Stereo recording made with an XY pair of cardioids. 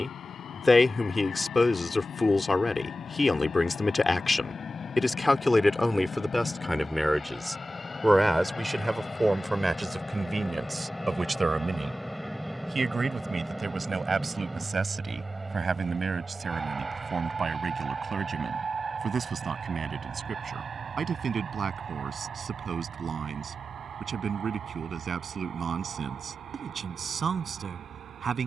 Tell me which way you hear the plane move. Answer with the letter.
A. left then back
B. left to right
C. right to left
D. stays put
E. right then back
B.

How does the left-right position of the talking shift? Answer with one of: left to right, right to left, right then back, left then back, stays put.
left to right.